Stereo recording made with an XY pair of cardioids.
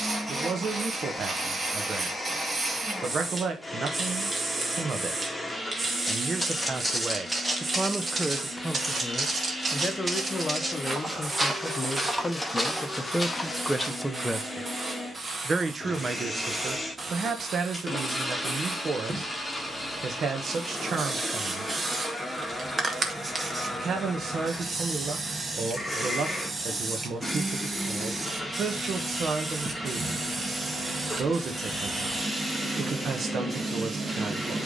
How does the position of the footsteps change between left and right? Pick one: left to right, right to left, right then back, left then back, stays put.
right then back.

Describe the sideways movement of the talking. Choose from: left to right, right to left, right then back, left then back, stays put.
left then back.